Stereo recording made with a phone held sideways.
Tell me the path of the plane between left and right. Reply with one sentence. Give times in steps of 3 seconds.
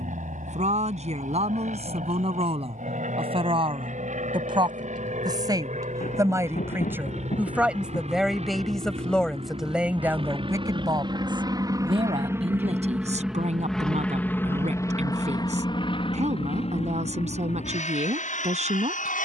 In this clip you hear the plane on the right from 0 s, in the centre from 12 s and on the left from 15 s.